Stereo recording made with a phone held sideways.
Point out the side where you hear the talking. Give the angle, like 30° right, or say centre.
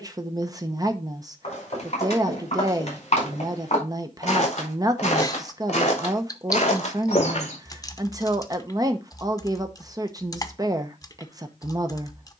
30° right.